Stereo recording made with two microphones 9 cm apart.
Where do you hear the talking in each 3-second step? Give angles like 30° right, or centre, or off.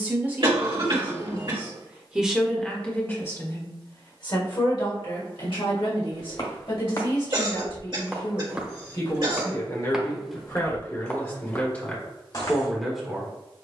10° right, 50° left, 60° left, 30° left, centre.